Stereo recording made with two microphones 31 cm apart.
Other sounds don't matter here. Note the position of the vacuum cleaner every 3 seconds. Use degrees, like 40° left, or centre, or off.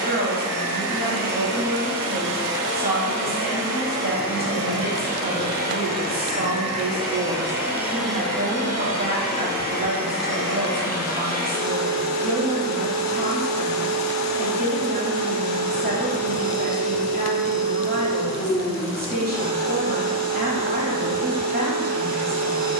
40° right, 30° right, 10° right, 40° left, 50° left, 50° left, 50° left, 50° left.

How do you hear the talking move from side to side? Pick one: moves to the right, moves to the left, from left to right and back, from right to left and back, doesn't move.
doesn't move.